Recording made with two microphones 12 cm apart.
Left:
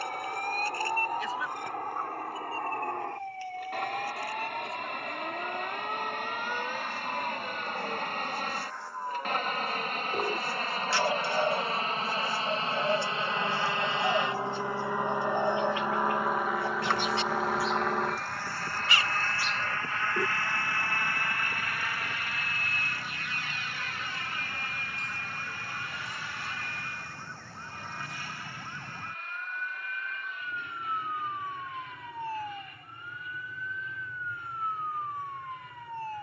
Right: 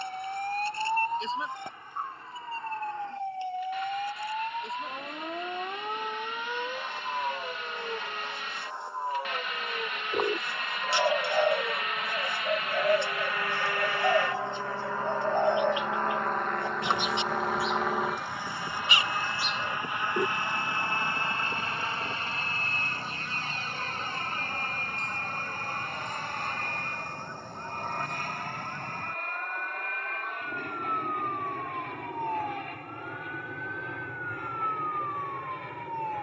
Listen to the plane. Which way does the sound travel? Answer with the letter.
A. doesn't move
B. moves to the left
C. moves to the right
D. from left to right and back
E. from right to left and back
C.